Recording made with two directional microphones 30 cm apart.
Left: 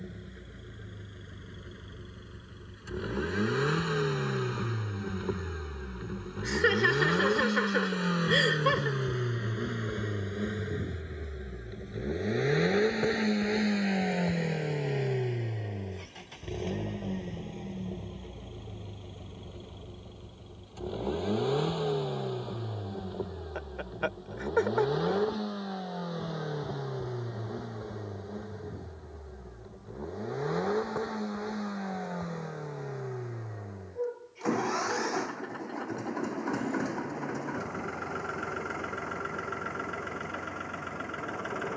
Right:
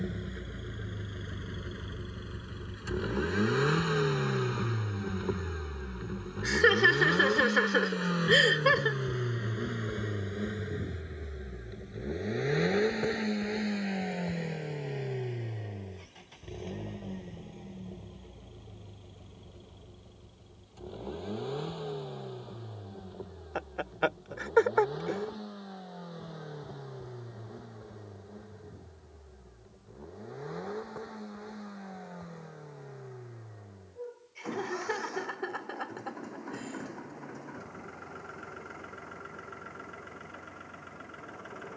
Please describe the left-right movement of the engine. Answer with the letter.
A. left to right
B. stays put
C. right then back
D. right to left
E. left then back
D.